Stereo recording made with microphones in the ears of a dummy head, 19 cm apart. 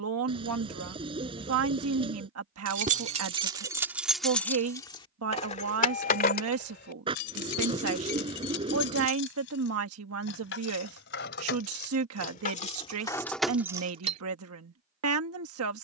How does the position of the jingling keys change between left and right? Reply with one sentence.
You can hear the jingling keys move from right to left and back again.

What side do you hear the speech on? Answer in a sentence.
In this clip you hear the speech on the right.